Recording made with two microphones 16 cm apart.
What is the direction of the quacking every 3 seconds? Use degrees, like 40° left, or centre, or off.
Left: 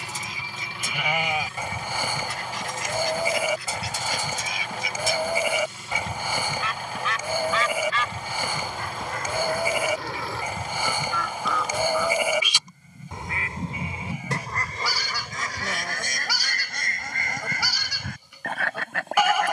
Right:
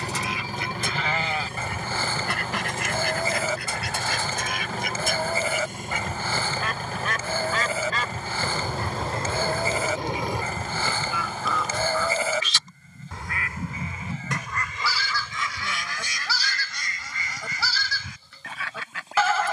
70° right, 60° right, 40° right, 20° right, 30° left, 50° left, 60° left.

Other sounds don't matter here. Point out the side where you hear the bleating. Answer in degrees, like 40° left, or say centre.
10° left.